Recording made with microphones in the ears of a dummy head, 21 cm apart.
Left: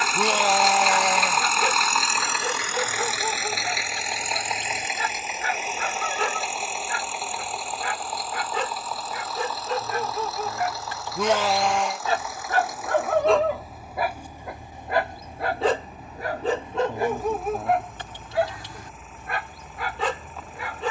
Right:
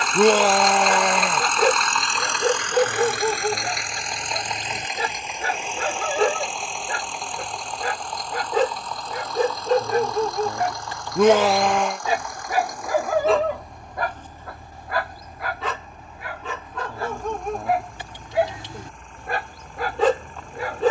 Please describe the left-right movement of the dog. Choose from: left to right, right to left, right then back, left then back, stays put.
left then back.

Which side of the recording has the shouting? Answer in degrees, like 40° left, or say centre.
50° right.